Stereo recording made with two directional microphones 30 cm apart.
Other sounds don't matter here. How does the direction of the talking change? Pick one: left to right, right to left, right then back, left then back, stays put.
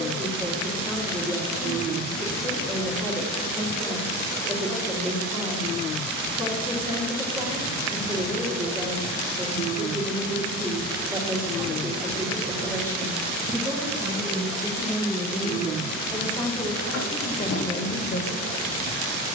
right to left.